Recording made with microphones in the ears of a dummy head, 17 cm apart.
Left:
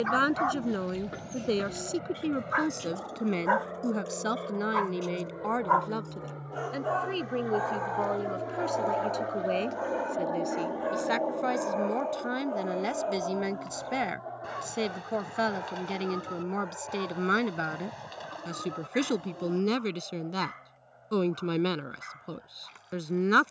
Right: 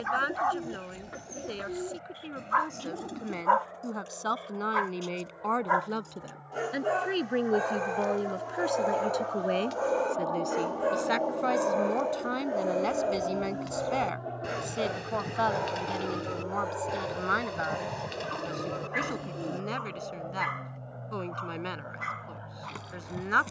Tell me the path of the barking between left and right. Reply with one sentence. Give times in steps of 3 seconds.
You can hear the barking on the left from 0 s, in the centre from 3 s and on the right from 6 s.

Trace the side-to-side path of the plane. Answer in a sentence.
You can hear the plane move from left to right.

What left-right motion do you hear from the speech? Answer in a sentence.
You can hear the speech move from left to right and back again.